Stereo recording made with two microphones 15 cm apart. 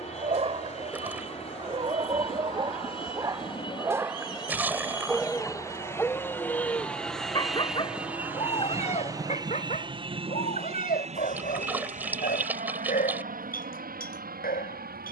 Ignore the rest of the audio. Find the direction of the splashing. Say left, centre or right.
centre.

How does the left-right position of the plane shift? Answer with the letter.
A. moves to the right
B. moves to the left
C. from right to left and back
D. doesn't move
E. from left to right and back
A.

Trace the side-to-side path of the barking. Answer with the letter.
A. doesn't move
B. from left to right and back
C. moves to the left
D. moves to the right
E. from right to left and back
C.